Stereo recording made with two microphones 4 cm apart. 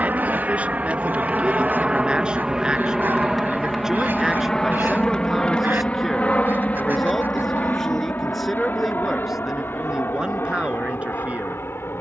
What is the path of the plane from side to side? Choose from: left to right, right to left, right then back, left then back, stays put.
right to left.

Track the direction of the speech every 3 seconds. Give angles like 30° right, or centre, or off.
30° right, 10° right, centre, 20° right.